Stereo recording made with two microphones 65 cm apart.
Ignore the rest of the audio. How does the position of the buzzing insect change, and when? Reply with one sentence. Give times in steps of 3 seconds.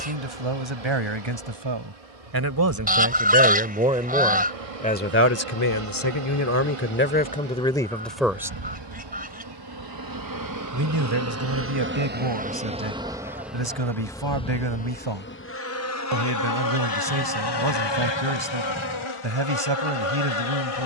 In this clip you hear the buzzing insect on the right from 0 s, in the centre from 12 s and on the left from 15 s.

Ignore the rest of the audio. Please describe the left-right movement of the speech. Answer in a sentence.
In this clip you hear the speech move from right to left and back again.